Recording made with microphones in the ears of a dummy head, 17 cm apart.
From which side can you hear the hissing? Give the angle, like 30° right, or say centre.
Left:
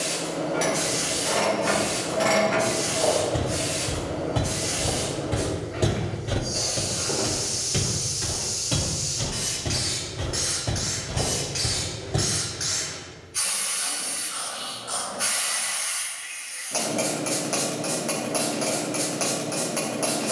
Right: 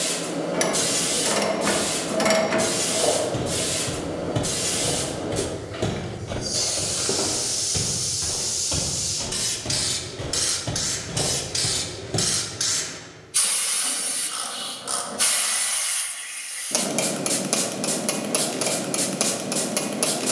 50° right.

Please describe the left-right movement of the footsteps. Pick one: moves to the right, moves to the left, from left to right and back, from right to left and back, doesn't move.
from right to left and back.